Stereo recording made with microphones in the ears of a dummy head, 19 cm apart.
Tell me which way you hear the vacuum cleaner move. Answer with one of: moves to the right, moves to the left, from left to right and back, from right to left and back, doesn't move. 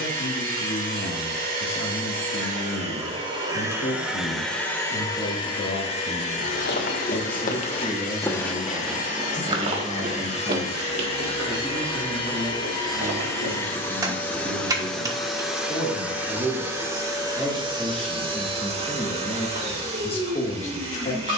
from right to left and back.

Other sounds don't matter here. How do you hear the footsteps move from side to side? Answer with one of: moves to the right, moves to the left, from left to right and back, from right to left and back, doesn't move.
moves to the right.